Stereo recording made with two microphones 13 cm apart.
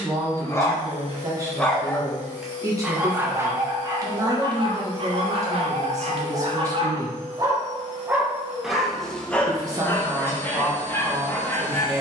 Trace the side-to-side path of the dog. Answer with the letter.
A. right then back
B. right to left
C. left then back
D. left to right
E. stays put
A.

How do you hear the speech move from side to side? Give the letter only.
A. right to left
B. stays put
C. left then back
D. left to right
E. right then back
B.